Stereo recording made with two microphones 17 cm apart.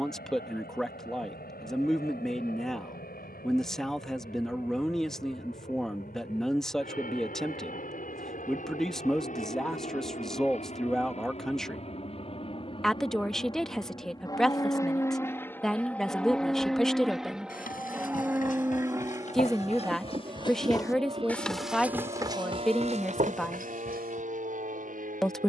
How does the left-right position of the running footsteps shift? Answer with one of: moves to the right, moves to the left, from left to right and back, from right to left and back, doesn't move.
moves to the right.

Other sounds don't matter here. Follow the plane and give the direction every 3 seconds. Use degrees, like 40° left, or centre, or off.
70° left, 70° left, 60° left, 50° left, 30° left, centre, 20° right, 40° right, 50° right.